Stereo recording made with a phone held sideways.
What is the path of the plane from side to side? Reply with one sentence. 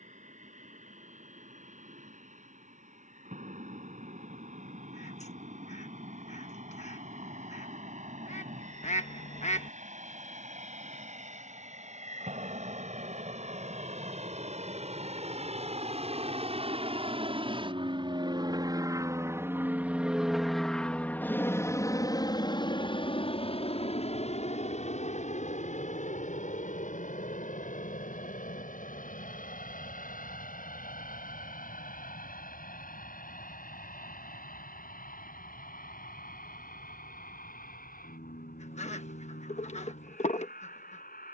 You can hear the plane go from the right side to the left.